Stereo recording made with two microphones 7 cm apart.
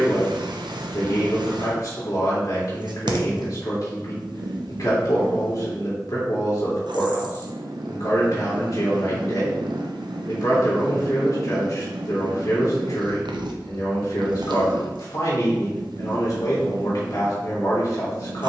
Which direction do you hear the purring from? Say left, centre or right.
right.